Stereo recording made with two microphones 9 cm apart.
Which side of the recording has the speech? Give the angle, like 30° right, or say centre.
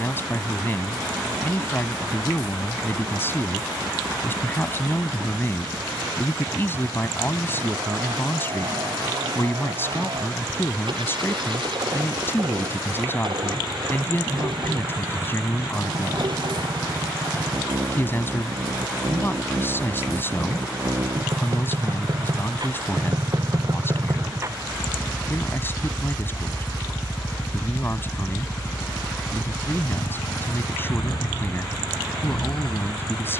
30° left.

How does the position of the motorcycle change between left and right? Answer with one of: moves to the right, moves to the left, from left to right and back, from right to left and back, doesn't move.
moves to the left.